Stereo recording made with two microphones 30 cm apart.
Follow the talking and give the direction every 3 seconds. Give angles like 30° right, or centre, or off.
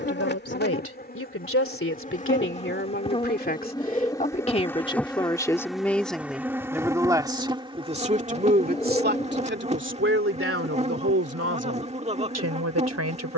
40° left, 20° left, 20° right, 40° right, 60° right.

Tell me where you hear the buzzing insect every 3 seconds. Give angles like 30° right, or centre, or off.
30° left, 10° left, 10° right, 20° right, 20° right.